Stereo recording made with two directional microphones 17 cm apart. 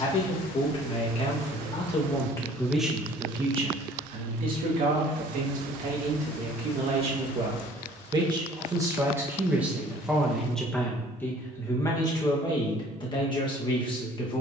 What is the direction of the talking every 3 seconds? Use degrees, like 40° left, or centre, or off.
30° left, 40° right, 30° right, centre, 30° left.